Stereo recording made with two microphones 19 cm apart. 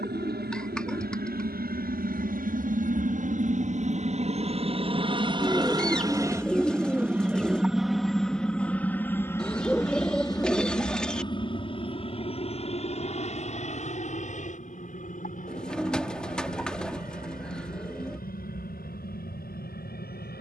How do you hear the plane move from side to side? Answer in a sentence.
You can hear the plane move from right to left.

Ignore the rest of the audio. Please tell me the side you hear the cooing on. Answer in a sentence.
You can hear the cooing in the centre.